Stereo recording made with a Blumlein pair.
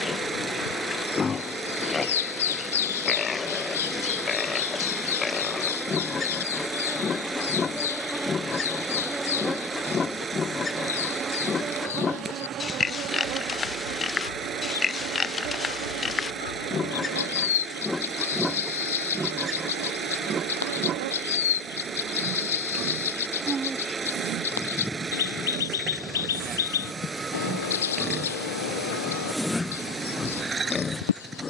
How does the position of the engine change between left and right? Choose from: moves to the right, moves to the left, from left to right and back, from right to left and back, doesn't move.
doesn't move.